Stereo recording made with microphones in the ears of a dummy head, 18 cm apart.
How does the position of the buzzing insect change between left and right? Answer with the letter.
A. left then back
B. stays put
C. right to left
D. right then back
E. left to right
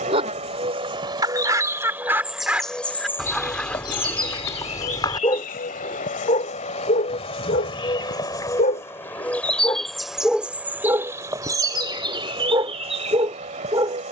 A.